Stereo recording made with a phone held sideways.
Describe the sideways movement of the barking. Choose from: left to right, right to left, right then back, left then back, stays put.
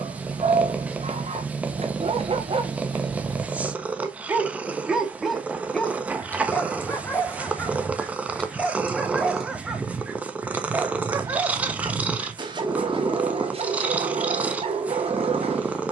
left then back.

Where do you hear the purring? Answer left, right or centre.
centre.